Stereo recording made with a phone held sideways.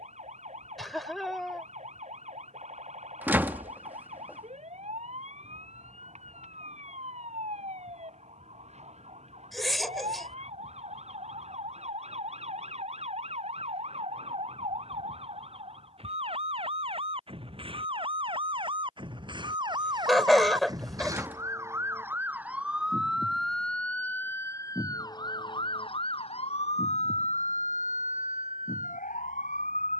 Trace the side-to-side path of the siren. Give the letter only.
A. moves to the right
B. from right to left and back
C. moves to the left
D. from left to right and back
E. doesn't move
C.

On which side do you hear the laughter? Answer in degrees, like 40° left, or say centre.
centre.